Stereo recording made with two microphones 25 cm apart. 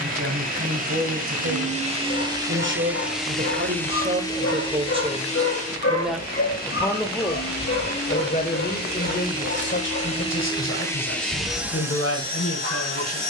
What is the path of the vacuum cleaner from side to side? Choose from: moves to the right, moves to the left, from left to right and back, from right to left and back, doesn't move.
from right to left and back.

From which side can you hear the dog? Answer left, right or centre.
left.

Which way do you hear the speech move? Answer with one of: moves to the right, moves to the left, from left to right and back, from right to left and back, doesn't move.
moves to the left.